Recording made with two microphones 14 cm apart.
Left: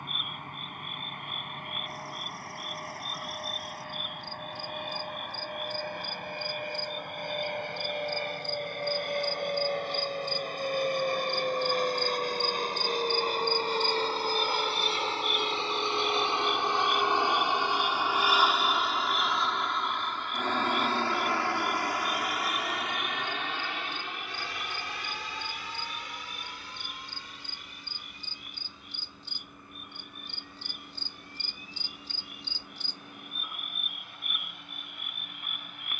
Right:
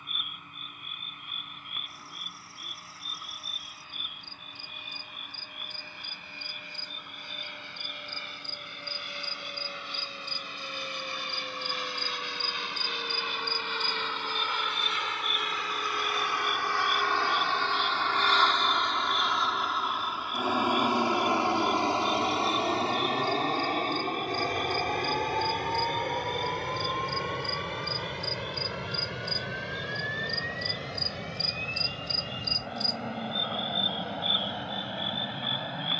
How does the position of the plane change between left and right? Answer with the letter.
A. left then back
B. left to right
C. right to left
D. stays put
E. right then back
B.